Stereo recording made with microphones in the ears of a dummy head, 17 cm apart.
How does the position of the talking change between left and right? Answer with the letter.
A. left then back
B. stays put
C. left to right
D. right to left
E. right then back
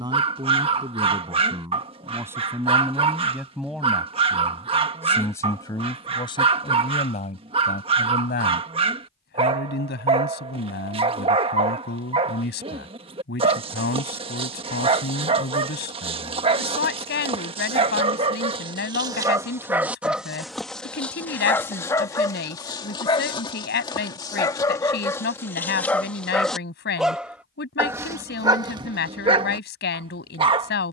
D.